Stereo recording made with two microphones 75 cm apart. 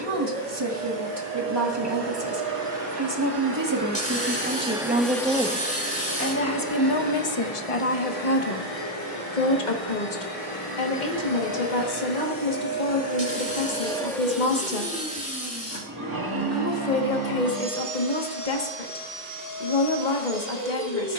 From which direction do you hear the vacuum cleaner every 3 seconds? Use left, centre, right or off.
right, centre, left, left, centre, right, right.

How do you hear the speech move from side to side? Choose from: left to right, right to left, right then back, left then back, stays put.
right to left.